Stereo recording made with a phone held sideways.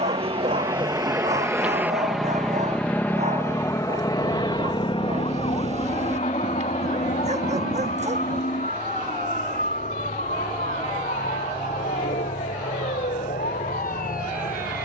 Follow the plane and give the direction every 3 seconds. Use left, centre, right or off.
centre, left, left, left, left.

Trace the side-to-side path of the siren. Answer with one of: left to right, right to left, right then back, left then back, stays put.
right to left.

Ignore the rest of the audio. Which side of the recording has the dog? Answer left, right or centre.
right.